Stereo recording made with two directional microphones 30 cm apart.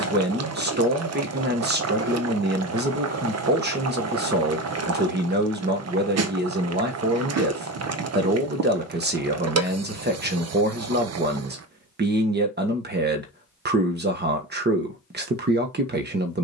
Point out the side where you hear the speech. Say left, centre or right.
right.